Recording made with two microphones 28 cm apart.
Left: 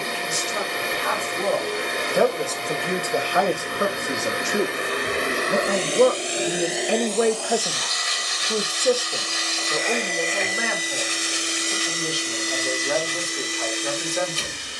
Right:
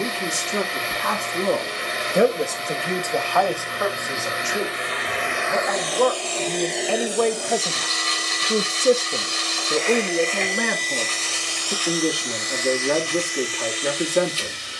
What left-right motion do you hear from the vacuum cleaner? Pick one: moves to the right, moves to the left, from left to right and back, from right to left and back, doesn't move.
from left to right and back.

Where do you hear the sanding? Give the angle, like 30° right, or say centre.
10° left.